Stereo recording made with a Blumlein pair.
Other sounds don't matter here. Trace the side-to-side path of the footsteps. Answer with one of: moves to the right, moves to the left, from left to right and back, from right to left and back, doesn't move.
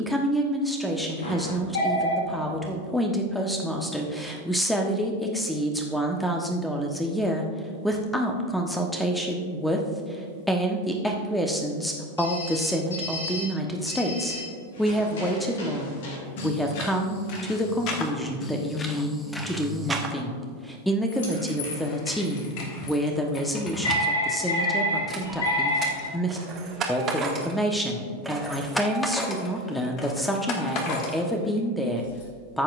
moves to the right.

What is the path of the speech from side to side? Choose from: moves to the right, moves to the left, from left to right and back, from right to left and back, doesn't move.
doesn't move.